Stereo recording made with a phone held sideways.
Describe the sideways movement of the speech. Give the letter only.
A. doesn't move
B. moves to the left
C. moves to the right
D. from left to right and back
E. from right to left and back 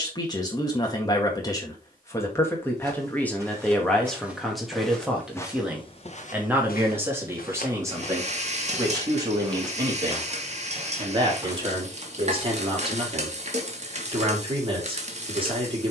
C.